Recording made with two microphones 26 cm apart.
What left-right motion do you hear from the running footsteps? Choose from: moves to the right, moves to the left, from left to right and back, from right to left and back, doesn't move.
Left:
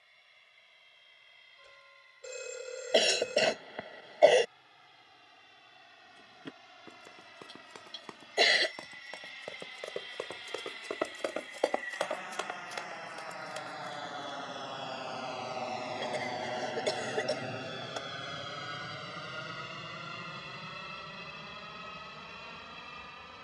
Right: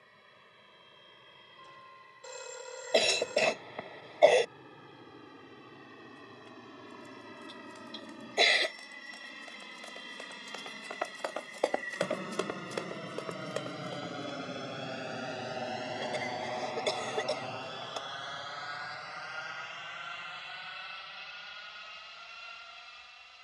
moves to the right.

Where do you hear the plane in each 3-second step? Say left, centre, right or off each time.
right, right, right, right, right, centre, left, left.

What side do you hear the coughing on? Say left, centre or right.
centre.